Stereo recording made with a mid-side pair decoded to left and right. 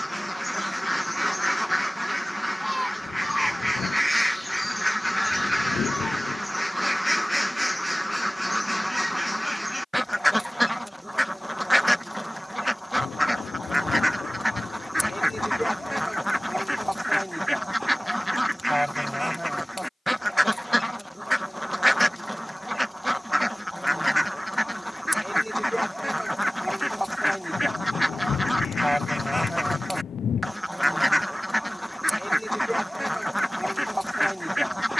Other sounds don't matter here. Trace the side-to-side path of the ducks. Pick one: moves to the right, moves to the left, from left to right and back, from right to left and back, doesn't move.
doesn't move.